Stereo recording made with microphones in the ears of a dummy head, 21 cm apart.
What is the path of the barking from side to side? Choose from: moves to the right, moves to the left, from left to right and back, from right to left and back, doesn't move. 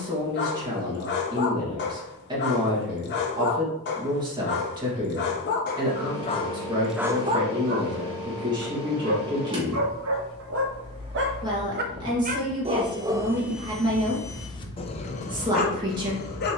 from left to right and back.